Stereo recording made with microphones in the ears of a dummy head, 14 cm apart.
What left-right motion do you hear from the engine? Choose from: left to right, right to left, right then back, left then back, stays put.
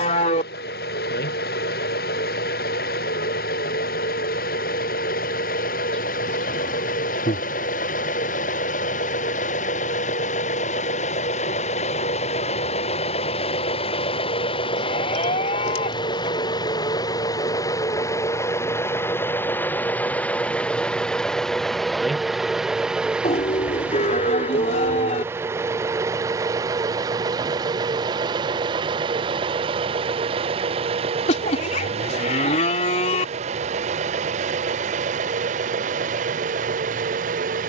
left to right.